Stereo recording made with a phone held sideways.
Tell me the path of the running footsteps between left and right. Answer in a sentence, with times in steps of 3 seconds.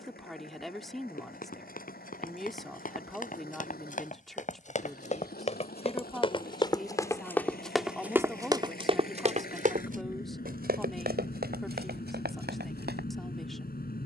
You can hear the running footsteps on the left from 0 s, in the centre from 6 s and on the right from 9 s.